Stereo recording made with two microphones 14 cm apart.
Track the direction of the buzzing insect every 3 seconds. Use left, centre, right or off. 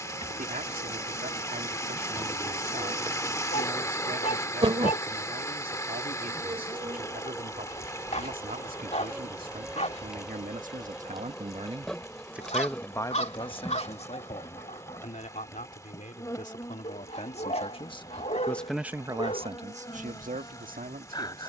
right, right, right, centre, centre, left, left.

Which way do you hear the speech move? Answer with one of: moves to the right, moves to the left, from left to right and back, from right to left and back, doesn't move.
from right to left and back.